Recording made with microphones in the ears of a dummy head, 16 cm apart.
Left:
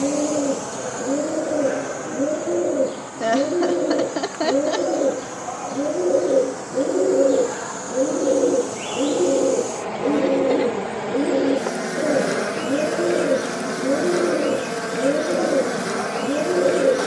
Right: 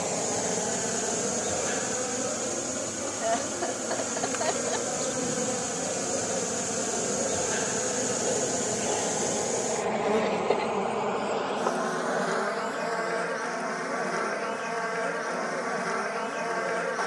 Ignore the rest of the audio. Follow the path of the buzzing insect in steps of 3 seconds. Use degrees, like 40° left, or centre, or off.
30° right, 50° right, 30° right, centre, 40° left, 40° left.